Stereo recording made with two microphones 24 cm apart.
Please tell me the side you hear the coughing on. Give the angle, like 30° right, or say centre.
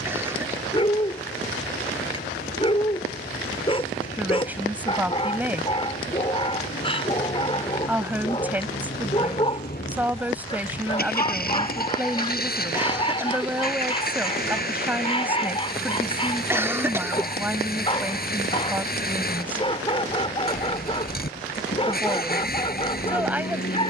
10° right.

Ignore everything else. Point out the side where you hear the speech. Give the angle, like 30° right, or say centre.
10° right.